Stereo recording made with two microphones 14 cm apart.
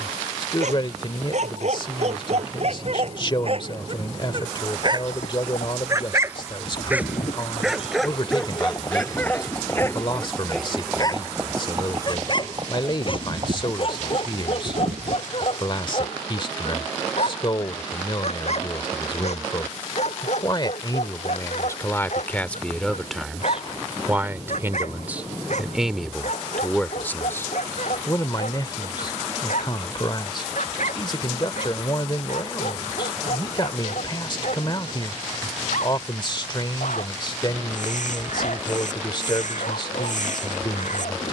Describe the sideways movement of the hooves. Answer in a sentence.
You can hear the hooves go from the left side to the right.